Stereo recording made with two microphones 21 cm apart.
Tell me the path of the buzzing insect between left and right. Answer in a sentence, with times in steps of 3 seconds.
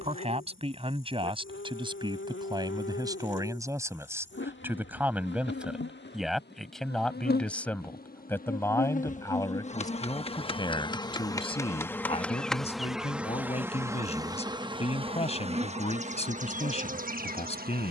You can hear the buzzing insect on the left from 0 s, in the centre from 12 s and on the right from 15 s.